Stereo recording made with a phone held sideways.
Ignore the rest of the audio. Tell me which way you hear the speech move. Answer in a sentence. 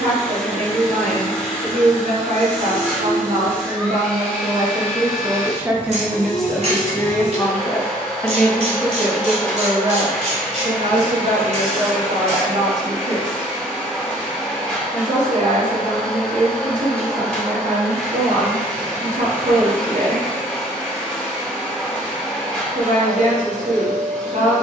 In this clip you hear the speech move from right to left and back again.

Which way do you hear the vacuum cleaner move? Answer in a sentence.
You can hear the vacuum cleaner stay in one place.